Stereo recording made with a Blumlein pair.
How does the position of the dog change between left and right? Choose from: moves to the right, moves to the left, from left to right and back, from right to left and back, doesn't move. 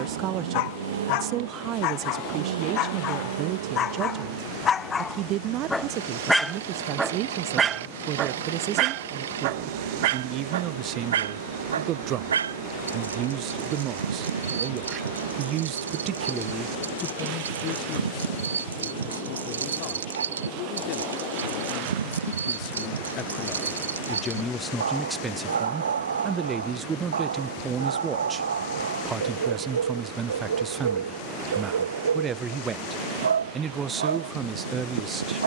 moves to the right.